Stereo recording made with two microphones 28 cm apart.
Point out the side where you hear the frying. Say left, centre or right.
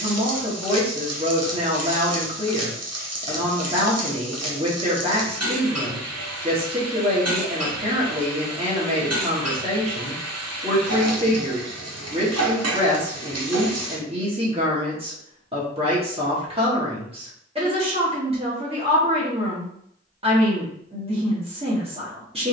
right.